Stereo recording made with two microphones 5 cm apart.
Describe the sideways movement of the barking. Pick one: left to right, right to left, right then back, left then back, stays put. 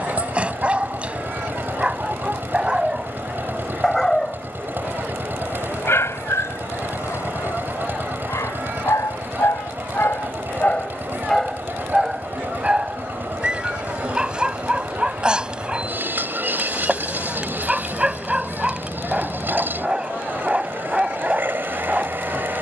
left then back.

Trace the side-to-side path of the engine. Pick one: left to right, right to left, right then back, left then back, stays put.
stays put.